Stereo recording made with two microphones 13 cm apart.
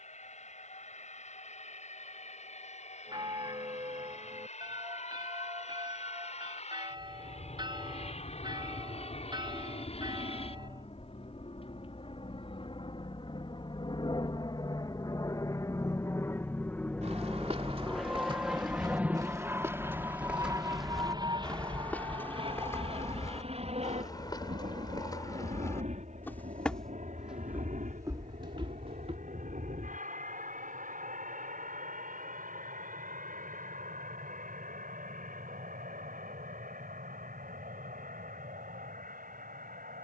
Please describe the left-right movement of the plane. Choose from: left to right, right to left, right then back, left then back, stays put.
left to right.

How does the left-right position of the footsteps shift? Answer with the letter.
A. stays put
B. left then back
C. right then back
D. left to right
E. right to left
B.